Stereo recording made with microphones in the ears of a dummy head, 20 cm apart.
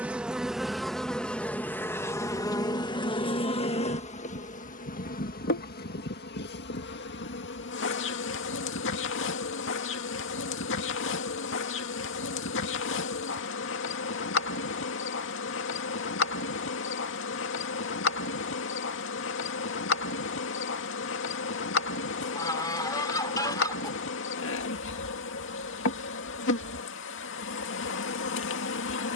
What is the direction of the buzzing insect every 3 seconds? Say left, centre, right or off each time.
centre, left, left, left, left, left, left, left, left, left.